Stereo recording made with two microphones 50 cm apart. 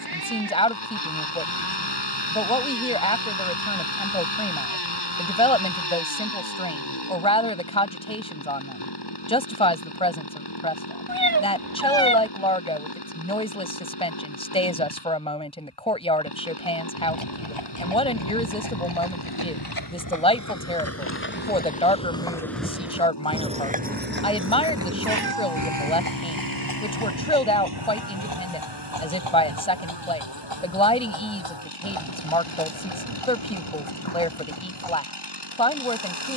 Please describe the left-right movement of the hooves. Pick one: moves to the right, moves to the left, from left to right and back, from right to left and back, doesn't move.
moves to the right.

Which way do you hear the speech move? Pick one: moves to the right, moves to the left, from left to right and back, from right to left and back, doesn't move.
doesn't move.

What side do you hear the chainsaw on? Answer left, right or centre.
left.